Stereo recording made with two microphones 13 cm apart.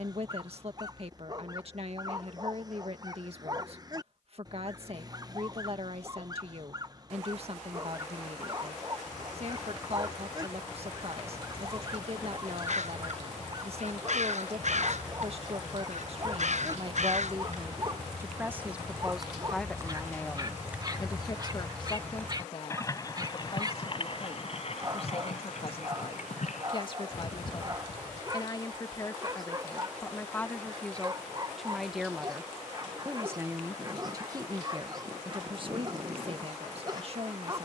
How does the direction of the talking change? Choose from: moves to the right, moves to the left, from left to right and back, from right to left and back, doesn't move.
from right to left and back.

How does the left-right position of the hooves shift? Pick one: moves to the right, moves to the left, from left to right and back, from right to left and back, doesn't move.
moves to the left.